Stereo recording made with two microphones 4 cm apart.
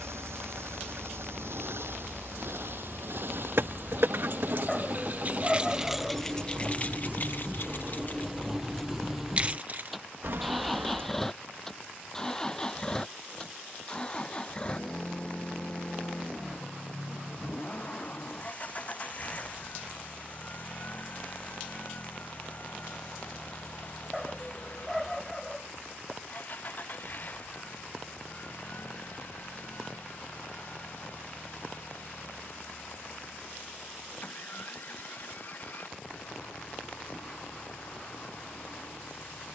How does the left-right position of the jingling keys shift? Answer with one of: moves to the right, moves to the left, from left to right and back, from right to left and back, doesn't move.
from right to left and back.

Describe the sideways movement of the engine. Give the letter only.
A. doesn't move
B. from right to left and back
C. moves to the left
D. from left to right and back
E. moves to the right
C.